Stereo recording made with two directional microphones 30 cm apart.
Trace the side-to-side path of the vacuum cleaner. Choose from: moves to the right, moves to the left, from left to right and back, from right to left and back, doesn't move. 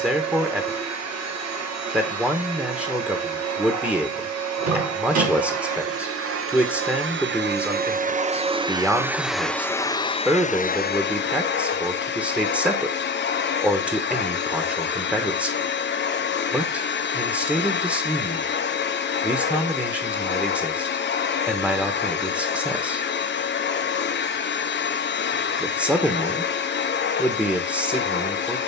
moves to the left.